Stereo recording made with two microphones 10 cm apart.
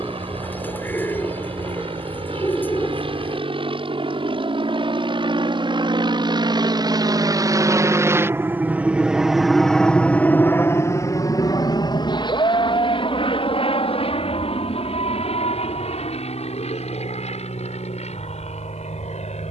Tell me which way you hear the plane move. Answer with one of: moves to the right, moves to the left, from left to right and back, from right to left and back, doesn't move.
moves to the left.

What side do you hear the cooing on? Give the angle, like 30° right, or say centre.
20° left.